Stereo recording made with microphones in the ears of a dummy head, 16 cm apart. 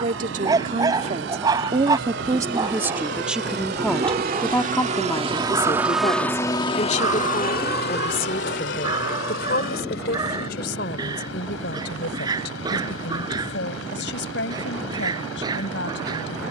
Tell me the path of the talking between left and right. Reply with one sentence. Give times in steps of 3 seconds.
You can hear the talking on the right from 0 s, in the centre from 3 s and on the left from 6 s.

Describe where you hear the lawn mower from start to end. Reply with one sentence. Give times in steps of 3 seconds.
In this clip you hear the lawn mower on the right from 0 s and on the left from 6 s.